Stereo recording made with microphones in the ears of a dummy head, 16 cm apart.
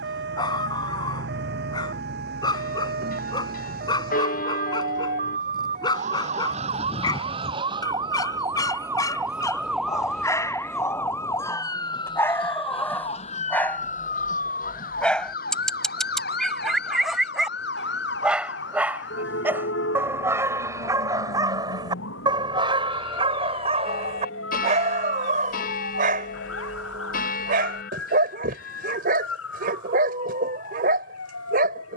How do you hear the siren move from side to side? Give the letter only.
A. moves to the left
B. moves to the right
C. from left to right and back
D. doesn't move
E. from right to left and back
A.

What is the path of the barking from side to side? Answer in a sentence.
In this clip you hear the barking move from left to right.